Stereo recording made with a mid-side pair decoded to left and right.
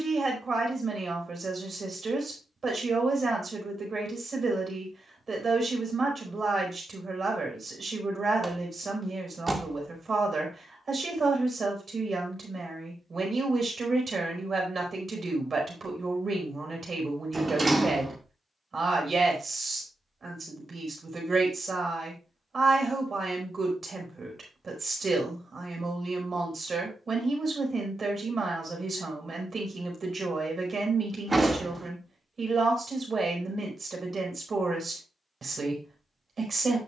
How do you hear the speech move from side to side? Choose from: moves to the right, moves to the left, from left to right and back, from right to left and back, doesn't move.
doesn't move.